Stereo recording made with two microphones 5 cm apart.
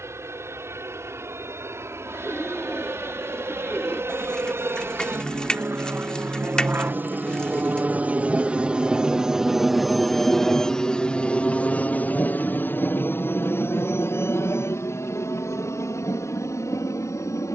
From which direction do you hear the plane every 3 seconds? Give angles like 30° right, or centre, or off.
70° right, 60° right, 40° right, 10° left, 40° left, 60° left.